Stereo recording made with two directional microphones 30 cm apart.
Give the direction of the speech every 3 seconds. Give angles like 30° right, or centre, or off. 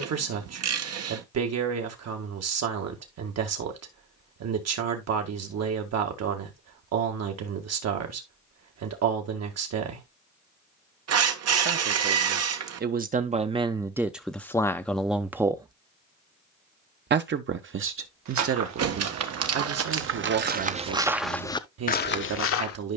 60° right, 60° right, 60° right, 50° right, 20° right, 30° right, 50° right, 60° right.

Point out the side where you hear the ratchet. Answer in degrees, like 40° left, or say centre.
60° right.